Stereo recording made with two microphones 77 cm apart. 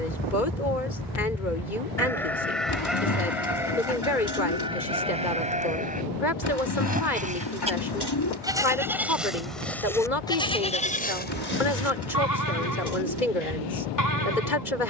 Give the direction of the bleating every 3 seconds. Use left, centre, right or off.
centre, centre, centre, centre, left.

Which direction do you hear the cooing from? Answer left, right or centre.
left.